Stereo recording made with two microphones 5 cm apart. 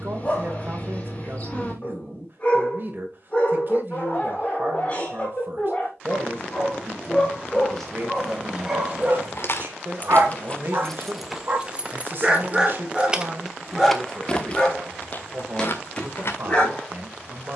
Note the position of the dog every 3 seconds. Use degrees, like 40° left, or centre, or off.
20° left, 20° left, 10° left, 50° right, centre, 20° left.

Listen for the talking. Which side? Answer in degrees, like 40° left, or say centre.
40° right.